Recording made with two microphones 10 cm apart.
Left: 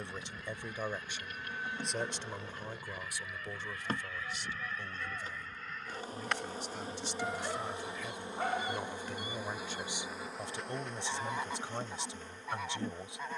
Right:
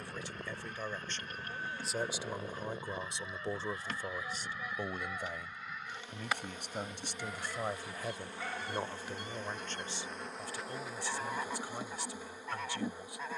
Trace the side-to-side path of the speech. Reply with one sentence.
You can hear the speech go right and come back.